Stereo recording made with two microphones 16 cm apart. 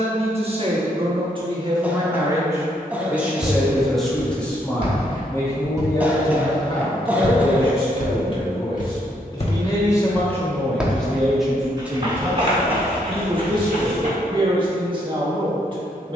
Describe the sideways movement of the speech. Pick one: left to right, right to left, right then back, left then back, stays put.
left then back.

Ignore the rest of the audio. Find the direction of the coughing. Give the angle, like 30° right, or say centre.
10° right.